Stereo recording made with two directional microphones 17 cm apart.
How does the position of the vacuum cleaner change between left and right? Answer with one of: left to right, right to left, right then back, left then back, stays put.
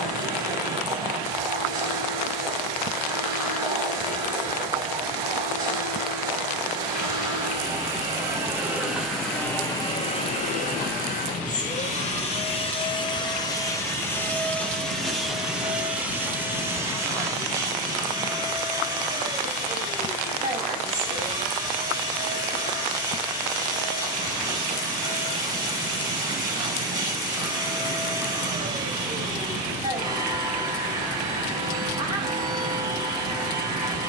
left then back.